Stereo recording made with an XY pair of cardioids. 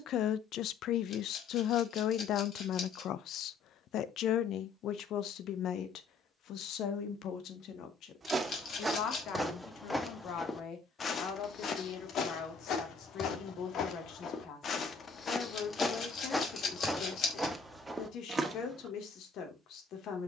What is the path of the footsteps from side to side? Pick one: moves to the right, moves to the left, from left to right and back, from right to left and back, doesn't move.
from right to left and back.